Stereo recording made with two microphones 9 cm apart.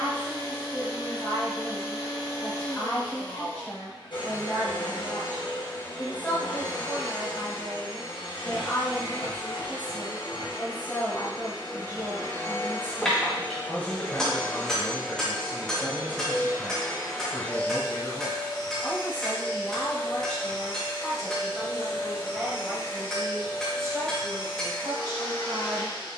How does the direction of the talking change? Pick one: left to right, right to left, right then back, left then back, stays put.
left to right.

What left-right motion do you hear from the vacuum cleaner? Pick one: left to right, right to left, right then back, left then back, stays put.
right then back.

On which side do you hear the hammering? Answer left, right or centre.
centre.